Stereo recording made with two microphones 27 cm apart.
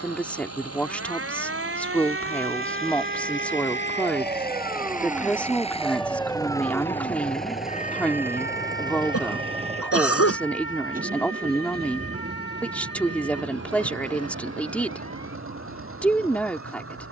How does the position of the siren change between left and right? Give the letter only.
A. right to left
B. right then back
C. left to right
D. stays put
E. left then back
A.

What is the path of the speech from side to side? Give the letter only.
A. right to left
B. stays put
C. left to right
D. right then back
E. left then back
B.